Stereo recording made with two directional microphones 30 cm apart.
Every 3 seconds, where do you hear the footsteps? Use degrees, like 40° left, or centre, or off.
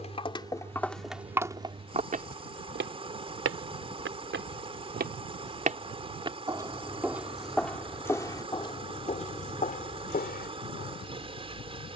10° right, 40° right, centre, 30° left.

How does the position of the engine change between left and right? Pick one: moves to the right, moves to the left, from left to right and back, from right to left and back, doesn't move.
doesn't move.